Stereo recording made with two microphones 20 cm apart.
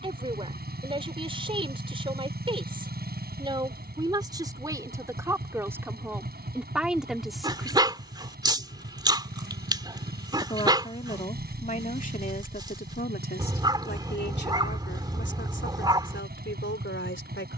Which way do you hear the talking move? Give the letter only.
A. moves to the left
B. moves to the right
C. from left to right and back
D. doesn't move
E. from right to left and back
A.